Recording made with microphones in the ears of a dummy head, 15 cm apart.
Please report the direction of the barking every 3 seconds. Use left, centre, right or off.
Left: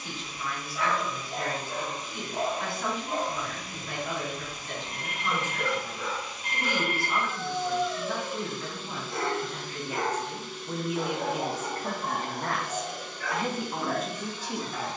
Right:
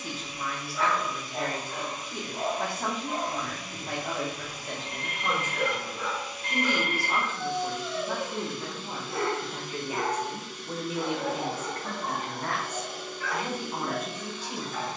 left, centre, right, left, left.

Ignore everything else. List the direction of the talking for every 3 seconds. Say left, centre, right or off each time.
right, right, right, centre, left.